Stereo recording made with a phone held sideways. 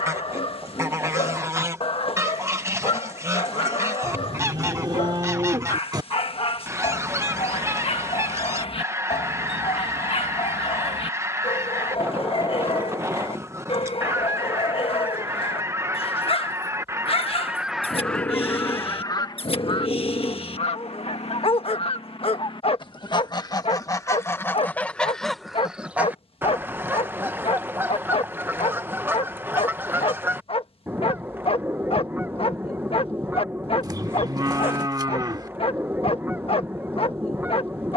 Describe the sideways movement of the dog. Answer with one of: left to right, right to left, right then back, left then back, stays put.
stays put.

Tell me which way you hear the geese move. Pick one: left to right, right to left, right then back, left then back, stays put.
left then back.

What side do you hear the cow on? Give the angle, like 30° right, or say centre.
30° right.